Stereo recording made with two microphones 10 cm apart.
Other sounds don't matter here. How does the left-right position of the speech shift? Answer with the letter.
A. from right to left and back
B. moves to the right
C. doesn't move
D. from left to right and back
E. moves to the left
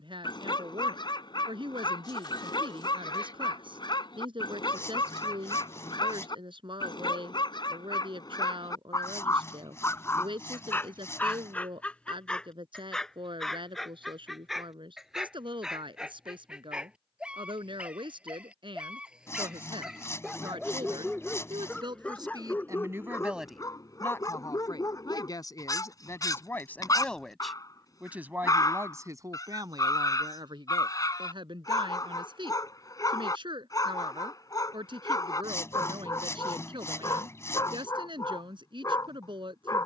A.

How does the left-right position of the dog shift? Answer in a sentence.
In this clip you hear the dog go right and come back.